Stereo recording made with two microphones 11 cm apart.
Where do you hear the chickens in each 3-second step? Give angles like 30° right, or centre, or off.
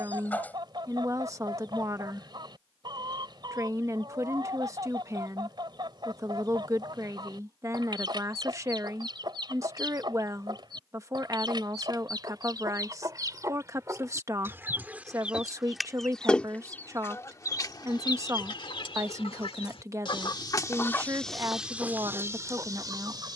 40° right, 40° right, 40° right, 40° right, 30° right, 10° left, 50° left, 20° right.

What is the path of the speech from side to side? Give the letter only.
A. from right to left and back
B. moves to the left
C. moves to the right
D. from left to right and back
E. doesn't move
E.